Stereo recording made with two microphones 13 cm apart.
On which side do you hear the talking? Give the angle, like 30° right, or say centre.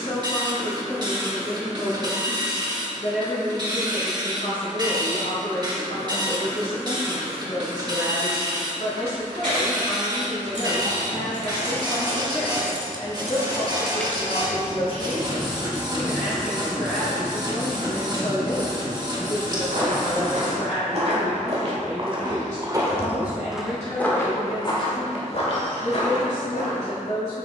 60° left.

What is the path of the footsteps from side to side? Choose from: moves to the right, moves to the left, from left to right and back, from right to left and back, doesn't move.
moves to the left.